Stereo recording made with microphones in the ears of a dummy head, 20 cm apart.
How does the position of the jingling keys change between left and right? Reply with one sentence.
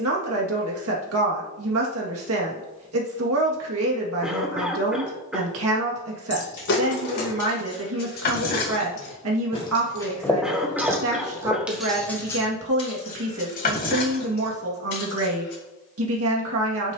In this clip you hear the jingling keys move from left to right and back again.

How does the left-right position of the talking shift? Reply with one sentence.
You can hear the talking stay in one place.